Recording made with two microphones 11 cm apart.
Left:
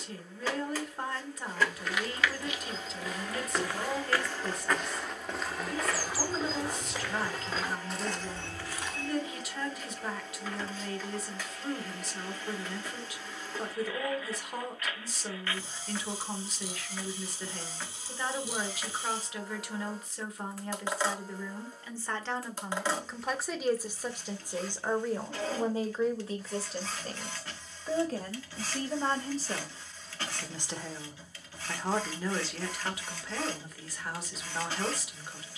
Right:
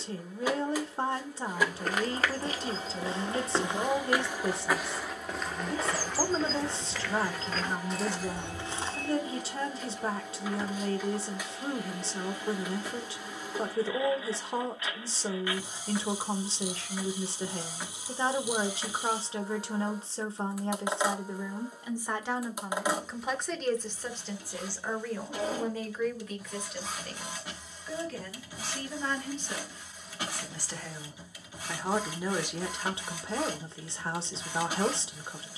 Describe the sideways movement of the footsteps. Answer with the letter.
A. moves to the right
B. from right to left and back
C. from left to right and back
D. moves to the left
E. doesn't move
B.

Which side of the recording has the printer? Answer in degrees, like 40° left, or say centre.
10° right.